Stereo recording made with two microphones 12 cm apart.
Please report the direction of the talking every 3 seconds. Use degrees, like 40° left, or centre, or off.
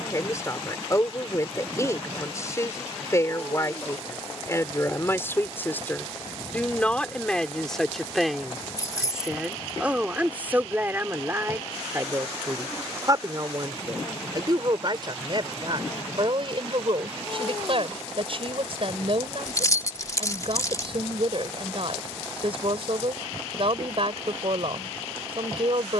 30° left, 20° left, centre, 20° right, 30° right, 50° right, 50° right, 50° right, 50° right.